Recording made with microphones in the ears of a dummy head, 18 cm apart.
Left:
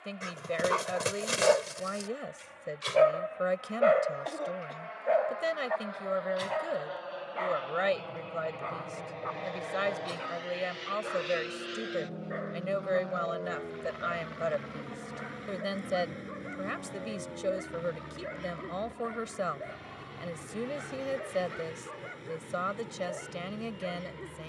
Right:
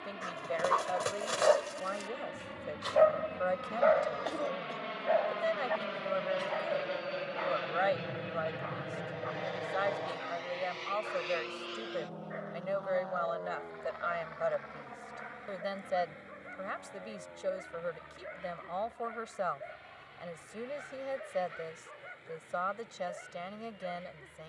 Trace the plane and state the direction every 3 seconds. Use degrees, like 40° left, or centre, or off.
60° right, 50° right, 30° right, 10° left, 30° left, 50° left, 60° left, 60° left.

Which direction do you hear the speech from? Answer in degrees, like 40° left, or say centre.
40° left.